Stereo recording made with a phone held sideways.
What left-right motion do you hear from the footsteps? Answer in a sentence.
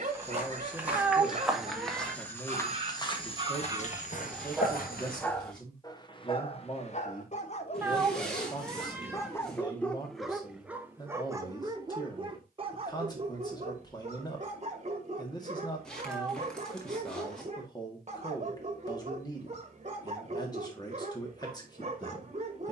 You can hear the footsteps move from right to left.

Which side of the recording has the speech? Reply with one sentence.
You can hear the speech on the left.